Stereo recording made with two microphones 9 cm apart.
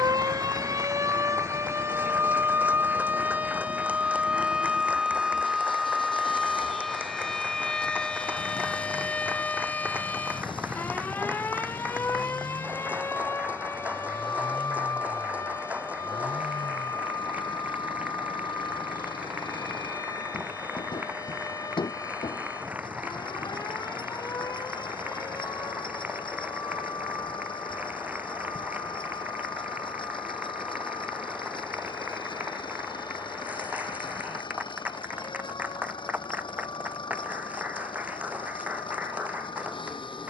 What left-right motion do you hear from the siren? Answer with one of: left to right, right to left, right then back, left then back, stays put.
right to left.